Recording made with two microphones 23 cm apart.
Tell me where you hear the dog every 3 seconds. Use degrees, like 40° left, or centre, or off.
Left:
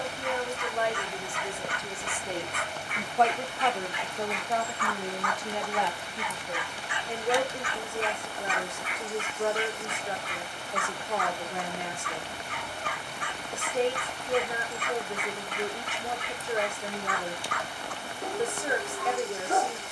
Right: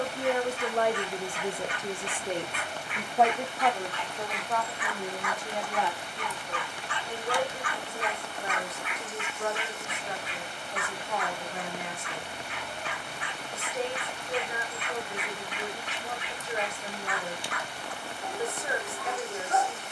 50° left, 10° left, 20° left, 40° left, 50° left, 50° left, 50° left.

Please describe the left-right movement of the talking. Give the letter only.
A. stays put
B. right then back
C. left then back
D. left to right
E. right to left
E.